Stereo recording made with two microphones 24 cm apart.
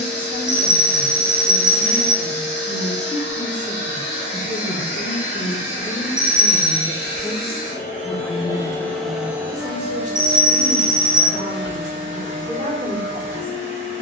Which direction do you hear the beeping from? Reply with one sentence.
In this clip you hear the beeping on the right.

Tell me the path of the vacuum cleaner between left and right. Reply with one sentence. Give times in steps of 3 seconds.
In this clip you hear the vacuum cleaner on the left from 0 s and on the right from 9 s.